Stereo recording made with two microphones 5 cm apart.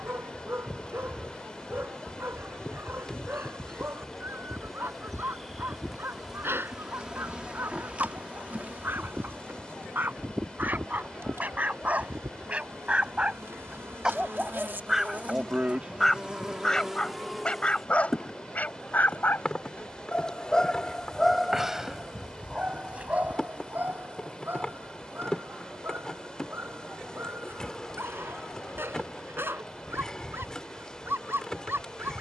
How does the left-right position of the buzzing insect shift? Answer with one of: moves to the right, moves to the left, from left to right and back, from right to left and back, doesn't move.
from left to right and back.